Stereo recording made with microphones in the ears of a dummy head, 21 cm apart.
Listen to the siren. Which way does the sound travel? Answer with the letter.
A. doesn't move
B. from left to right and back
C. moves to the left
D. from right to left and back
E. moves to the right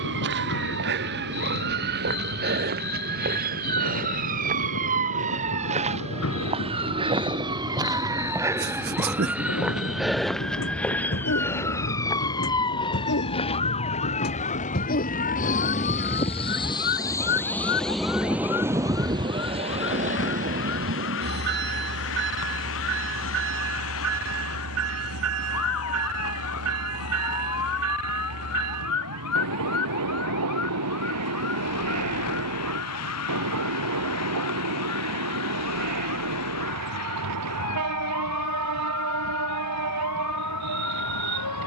C.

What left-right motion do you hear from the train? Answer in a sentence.
You can hear the train go from the left side to the right.